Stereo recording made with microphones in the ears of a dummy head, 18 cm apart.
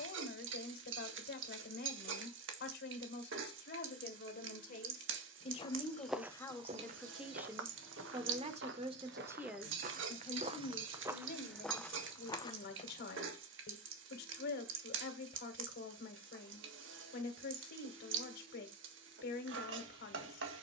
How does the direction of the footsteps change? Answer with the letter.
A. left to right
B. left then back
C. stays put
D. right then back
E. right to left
D.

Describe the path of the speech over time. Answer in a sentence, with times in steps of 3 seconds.
You can hear the speech on the left from 0 s, in the centre from 6 s and on the left from 9 s.